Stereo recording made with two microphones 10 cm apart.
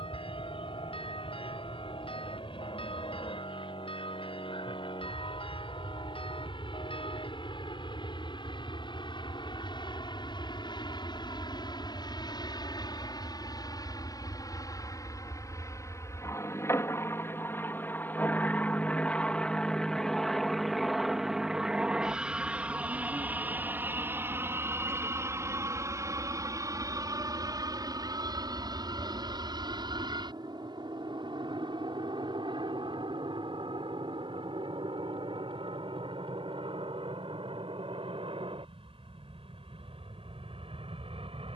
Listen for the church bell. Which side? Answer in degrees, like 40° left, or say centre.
70° left.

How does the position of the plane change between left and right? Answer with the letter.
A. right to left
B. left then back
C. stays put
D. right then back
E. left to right
E.